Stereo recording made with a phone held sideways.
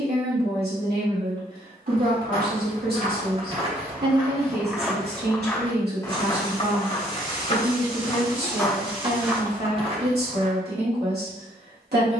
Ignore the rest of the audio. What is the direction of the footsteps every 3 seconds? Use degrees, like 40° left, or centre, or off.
50° right, 20° right, 30° left, 30° right.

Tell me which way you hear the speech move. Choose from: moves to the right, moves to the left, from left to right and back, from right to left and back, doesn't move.
doesn't move.